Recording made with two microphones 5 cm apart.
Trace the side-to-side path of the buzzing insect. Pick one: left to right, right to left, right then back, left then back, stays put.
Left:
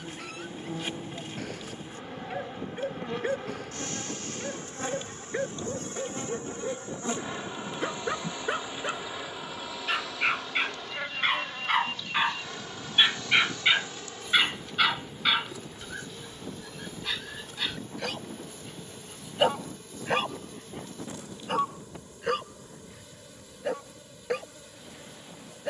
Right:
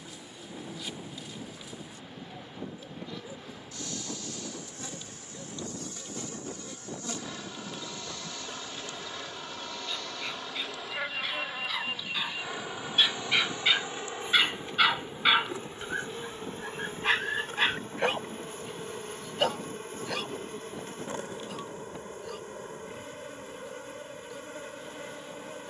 left to right.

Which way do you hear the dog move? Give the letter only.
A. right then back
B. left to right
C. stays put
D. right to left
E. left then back
A.